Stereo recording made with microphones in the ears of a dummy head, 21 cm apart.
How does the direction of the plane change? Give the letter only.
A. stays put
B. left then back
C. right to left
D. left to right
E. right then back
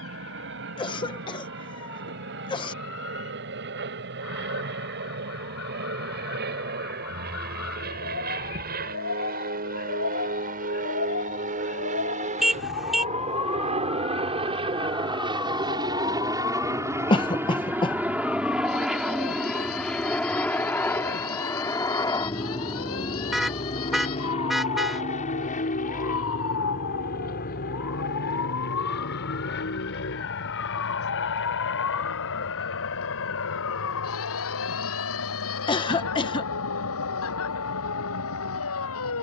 C.